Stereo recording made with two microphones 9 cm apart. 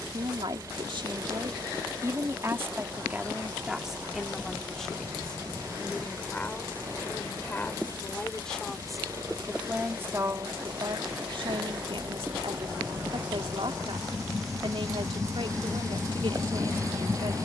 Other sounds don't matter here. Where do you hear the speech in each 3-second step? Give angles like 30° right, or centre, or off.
50° right, centre, 10° left, 50° right, 80° right, 80° right.